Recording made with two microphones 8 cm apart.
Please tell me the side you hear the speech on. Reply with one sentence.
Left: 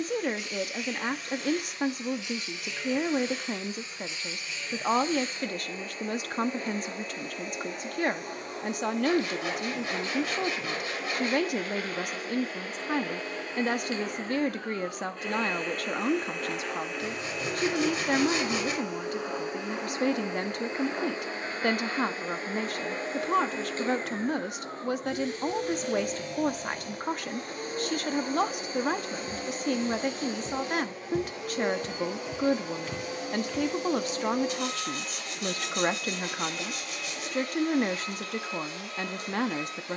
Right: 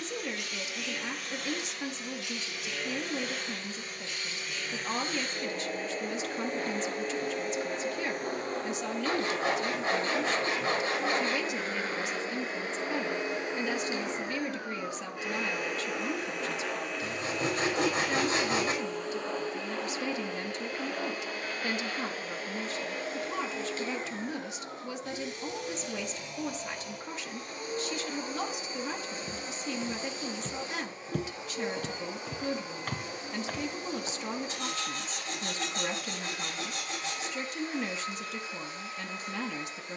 You can hear the speech on the left.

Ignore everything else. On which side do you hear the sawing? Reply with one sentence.
In this clip you hear the sawing on the right.